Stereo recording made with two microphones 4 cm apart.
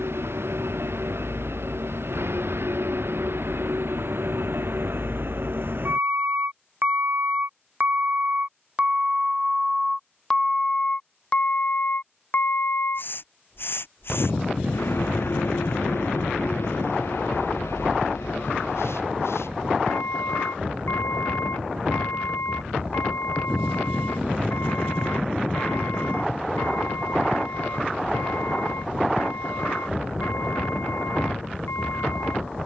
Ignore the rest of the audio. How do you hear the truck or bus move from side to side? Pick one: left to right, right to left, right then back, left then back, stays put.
right to left.